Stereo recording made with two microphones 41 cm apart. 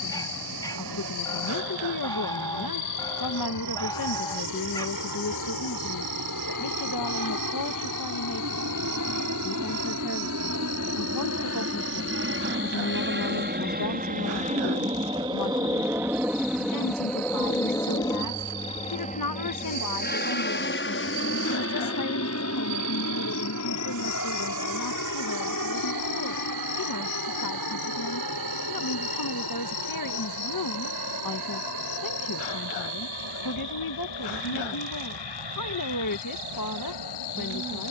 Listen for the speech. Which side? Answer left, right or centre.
left.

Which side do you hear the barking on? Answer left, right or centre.
centre.